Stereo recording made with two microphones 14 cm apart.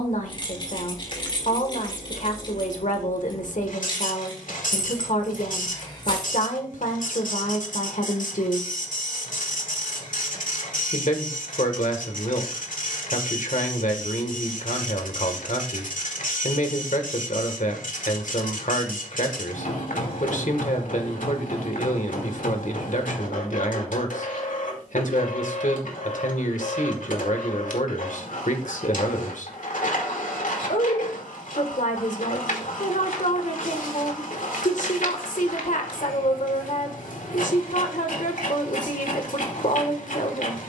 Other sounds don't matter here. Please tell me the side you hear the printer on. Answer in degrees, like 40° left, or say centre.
80° left.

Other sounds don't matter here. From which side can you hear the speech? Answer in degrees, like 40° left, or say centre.
70° left.